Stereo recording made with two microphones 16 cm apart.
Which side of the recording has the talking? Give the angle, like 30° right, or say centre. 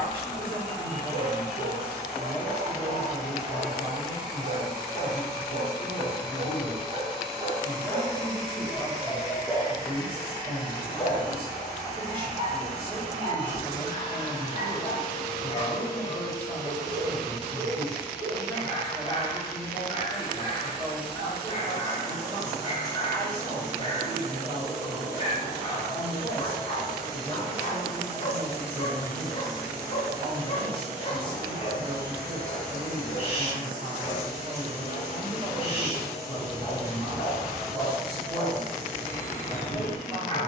30° right.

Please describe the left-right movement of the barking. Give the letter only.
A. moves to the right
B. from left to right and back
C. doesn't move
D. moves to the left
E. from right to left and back
D.